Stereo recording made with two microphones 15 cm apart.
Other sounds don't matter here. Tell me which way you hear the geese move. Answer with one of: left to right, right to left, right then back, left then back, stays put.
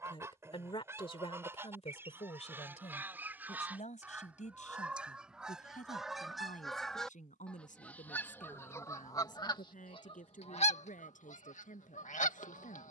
right to left.